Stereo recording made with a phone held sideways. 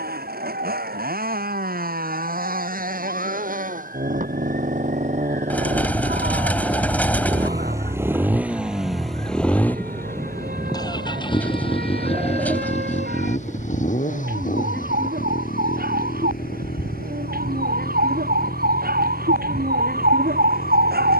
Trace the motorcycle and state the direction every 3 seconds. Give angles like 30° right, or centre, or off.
60° right, 50° right, 20° right, 20° left, 50° left, 60° left, 70° left.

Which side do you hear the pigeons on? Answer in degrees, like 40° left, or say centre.
10° left.